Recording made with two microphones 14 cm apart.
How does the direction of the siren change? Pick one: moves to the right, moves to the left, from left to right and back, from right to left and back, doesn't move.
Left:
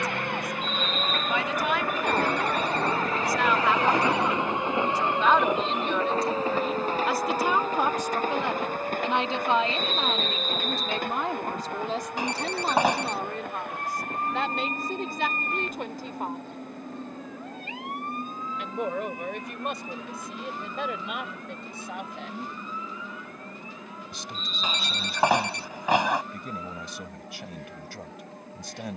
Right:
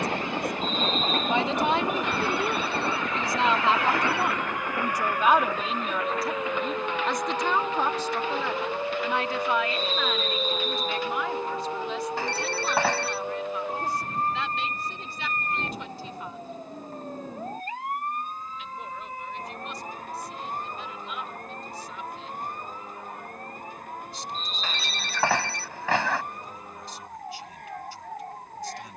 moves to the right.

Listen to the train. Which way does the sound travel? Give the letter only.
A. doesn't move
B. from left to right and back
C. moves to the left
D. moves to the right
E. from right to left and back
C.